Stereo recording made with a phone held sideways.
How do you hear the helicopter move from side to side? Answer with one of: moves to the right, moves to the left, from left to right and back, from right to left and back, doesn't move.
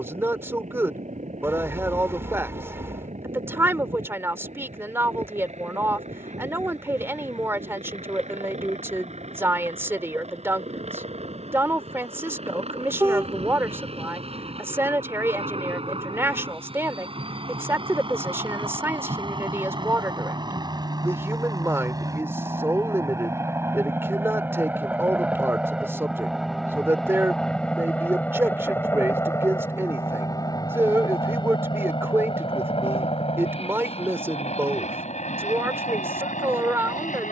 moves to the left.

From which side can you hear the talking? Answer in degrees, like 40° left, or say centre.
20° right.